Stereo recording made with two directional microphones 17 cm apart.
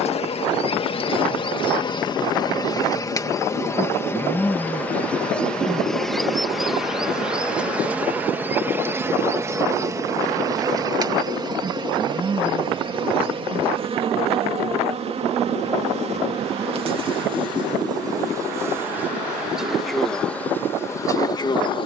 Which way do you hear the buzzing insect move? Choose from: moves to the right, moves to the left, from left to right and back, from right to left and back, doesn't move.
from left to right and back.